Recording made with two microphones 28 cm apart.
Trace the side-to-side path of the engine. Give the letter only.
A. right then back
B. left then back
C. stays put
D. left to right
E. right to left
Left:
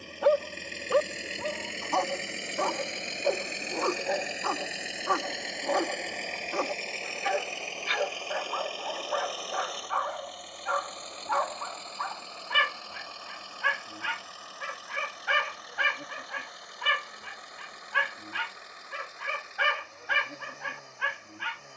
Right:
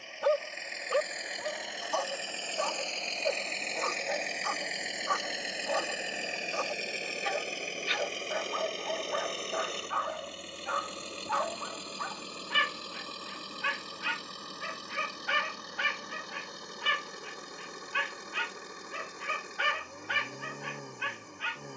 D.